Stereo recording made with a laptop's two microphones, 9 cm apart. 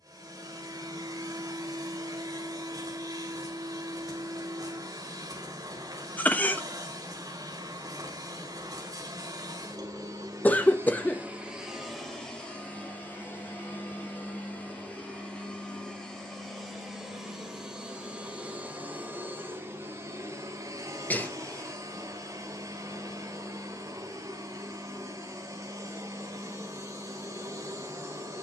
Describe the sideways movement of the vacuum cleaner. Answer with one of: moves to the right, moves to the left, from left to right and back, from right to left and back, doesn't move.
from right to left and back.